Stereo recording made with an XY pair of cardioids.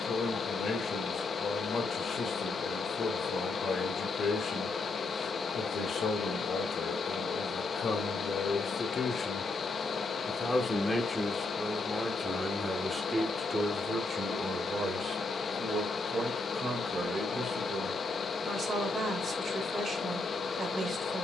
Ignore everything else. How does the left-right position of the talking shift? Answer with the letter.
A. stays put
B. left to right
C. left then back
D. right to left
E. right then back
B.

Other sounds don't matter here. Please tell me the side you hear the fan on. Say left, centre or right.
left.